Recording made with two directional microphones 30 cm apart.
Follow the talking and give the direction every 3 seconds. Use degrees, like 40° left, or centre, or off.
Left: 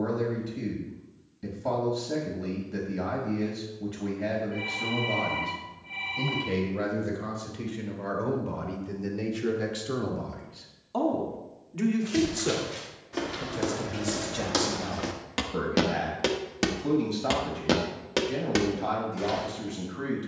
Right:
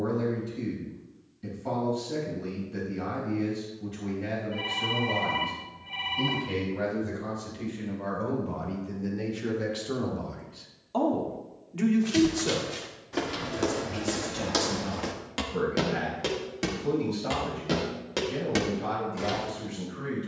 50° left, 50° left, 40° left, 10° left, 30° left, 50° left, 50° left.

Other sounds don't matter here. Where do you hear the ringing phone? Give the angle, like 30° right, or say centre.
10° right.